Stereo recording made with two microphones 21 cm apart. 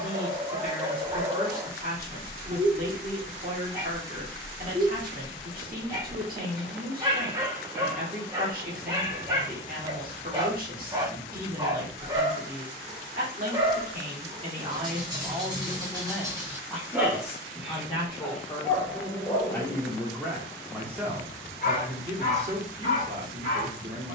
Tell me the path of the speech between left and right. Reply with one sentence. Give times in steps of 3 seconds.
In this clip you hear the speech on the right from 0 s, in the centre from 15 s and on the right from 21 s.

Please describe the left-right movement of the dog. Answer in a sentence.
You can hear the dog travel towards the left.